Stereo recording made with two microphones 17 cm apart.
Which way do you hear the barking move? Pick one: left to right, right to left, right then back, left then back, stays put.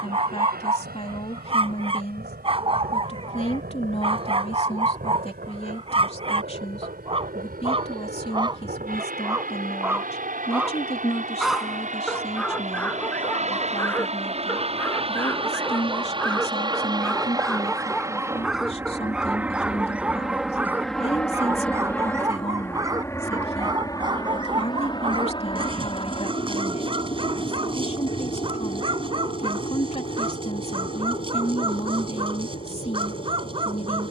left then back.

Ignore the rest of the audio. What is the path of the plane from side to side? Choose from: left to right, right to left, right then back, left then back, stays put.
right to left.